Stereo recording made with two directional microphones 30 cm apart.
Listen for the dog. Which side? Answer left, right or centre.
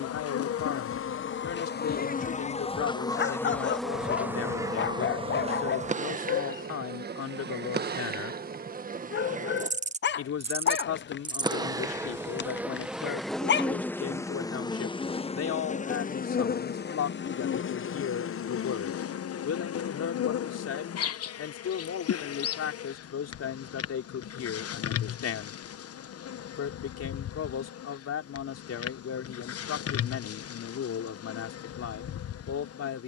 left.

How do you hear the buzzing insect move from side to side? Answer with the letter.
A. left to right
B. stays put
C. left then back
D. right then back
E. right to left
D.